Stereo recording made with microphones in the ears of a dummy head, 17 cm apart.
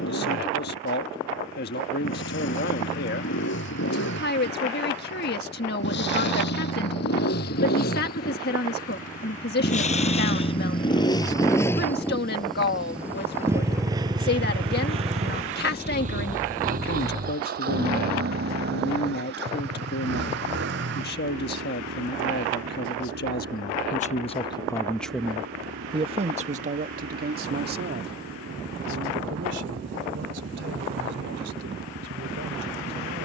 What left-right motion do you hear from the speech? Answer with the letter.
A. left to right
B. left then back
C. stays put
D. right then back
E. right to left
A.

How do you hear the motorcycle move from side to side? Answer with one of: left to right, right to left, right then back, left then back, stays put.
left to right.